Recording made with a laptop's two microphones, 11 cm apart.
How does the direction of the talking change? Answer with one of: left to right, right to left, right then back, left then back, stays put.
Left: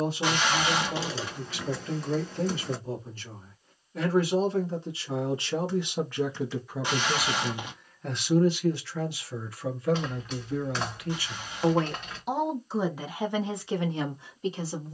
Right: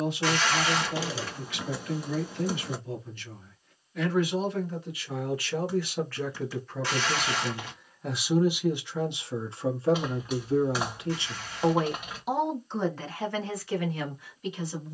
right then back.